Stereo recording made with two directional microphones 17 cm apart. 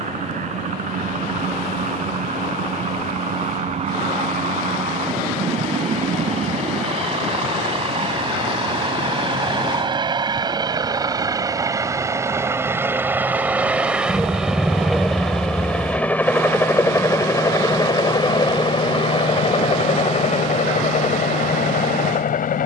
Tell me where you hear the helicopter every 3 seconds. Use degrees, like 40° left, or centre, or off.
50° right, 40° right, 40° right, 30° right, 10° right, 10° left, 30° left, 50° left.